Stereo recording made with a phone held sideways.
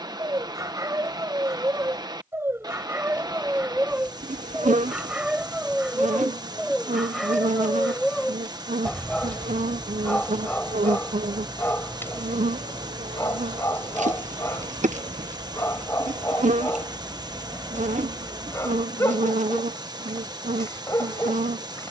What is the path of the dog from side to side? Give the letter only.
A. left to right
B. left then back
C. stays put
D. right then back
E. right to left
E.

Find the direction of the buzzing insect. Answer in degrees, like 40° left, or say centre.
60° right.